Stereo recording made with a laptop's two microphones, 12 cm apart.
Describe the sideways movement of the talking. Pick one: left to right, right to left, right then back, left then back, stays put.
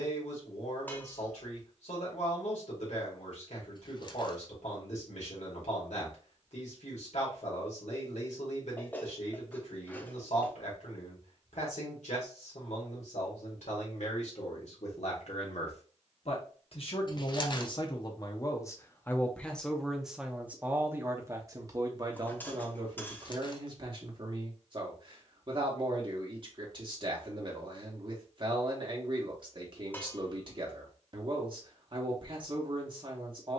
left to right.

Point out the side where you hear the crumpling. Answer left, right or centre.
left.